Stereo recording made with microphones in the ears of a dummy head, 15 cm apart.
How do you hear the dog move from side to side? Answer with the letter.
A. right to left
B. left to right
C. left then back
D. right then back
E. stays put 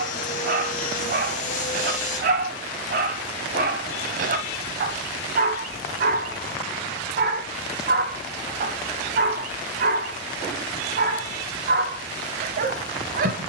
E.